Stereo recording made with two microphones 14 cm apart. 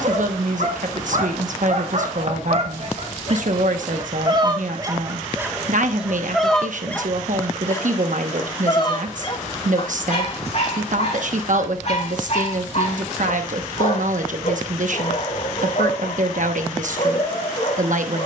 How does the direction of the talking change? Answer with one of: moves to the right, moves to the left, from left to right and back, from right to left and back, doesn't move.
doesn't move.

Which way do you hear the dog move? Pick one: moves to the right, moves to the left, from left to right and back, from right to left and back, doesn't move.
moves to the left.